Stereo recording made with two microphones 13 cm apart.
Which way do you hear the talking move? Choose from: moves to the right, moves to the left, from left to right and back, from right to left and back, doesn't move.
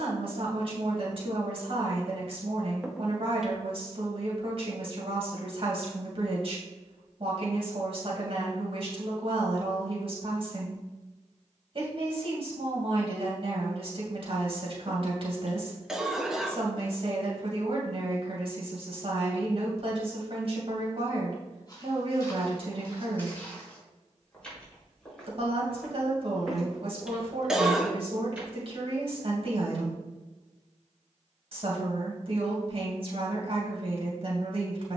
doesn't move.